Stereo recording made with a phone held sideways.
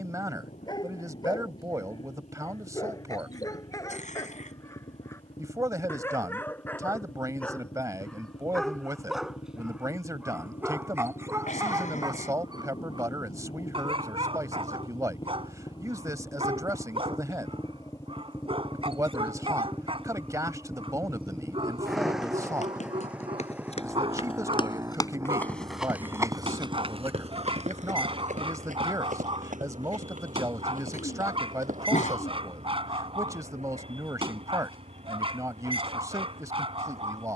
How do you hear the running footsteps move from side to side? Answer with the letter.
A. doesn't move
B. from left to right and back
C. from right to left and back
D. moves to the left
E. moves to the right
E.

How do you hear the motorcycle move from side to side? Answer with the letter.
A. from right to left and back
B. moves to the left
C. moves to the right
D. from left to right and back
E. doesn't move
C.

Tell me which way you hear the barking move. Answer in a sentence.
You can hear the barking move to the right.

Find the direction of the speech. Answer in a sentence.
In this clip you hear the speech on the right.